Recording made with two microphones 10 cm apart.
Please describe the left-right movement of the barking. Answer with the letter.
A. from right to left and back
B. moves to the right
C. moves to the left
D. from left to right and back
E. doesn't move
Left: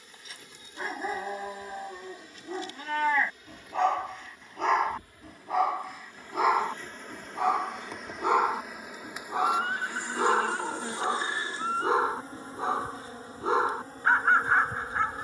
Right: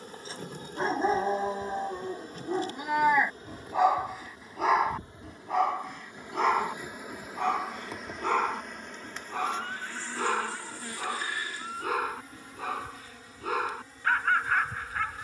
C.